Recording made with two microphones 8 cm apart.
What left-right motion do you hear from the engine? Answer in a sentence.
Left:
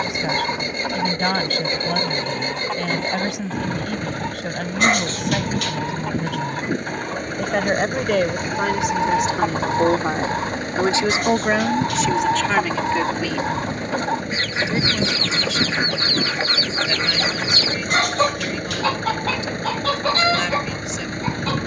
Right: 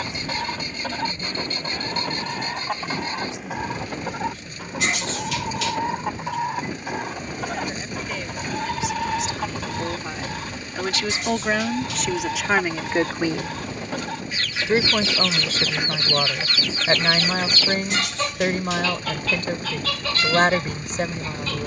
You can hear the engine stay put.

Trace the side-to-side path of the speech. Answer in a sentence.
In this clip you hear the speech move to the right.